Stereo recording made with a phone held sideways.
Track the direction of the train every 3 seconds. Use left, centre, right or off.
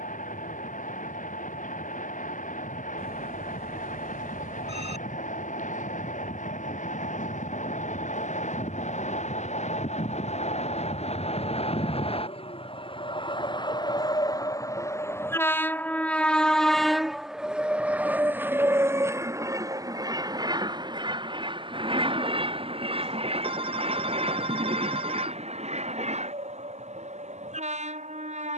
left, left, left, left, left, centre, right, right, right, right.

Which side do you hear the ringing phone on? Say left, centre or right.
right.